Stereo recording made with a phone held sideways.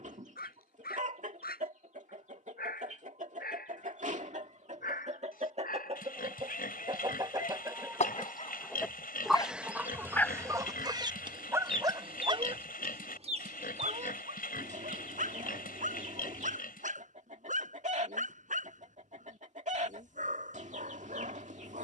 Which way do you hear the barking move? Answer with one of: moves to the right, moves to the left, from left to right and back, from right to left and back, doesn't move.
moves to the right.